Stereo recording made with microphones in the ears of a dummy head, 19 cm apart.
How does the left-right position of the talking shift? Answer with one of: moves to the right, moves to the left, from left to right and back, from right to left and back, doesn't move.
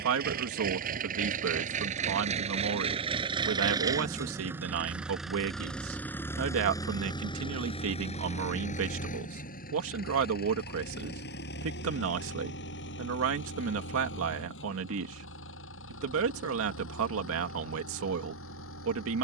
doesn't move.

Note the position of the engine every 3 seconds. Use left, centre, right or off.
right, centre, left, left, left, left, left.